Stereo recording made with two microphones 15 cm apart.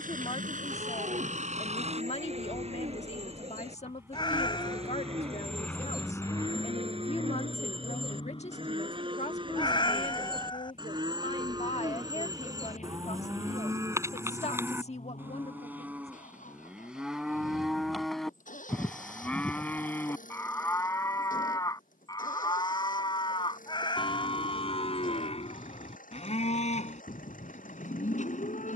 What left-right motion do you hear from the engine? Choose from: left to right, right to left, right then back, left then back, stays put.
right to left.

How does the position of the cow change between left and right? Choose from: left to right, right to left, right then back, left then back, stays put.
right to left.